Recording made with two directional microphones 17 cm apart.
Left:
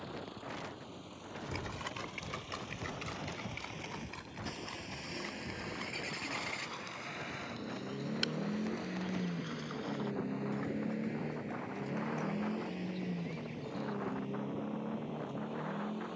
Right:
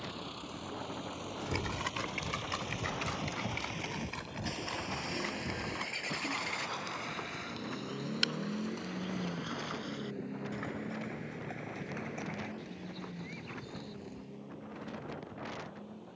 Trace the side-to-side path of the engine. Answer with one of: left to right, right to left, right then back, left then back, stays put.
right to left.